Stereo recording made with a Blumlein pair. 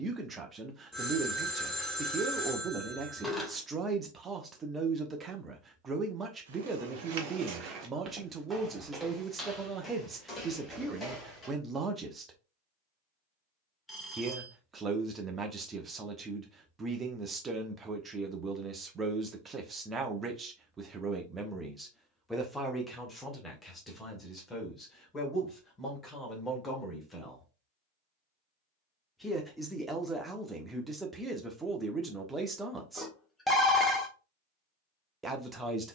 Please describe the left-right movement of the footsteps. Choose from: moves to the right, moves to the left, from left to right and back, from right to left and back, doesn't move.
moves to the left.